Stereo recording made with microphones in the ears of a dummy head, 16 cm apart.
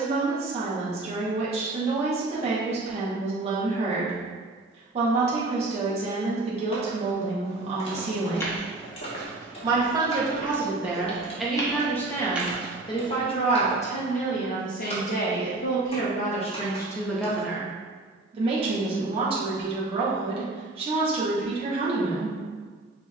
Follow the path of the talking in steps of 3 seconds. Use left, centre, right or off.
right, right, right, centre, left, left, right, right.